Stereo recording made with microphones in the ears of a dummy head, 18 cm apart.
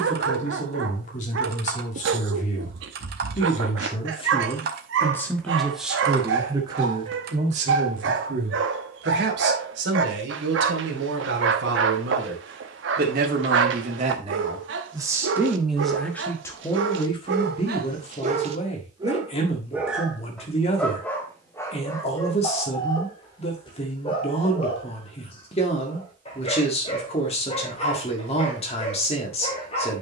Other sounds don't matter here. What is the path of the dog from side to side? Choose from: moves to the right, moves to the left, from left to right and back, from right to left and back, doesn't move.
moves to the left.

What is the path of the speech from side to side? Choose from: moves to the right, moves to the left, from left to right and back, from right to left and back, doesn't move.
from left to right and back.